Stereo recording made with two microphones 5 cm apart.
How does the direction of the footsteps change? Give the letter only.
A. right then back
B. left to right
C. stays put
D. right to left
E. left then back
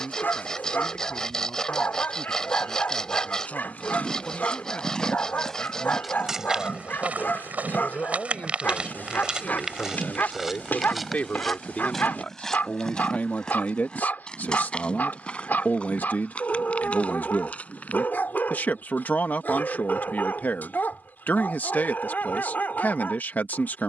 A.